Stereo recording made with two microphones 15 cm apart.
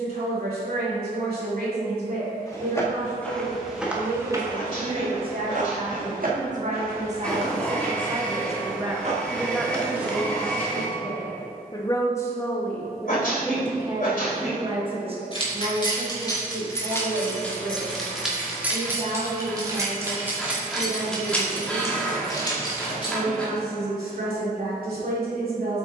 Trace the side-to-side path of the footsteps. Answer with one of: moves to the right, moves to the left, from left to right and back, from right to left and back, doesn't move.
from left to right and back.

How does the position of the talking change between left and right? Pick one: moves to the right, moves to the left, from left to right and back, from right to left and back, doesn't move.
from right to left and back.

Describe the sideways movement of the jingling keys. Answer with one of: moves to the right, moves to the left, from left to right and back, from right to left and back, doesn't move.
from left to right and back.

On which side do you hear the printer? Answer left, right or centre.
centre.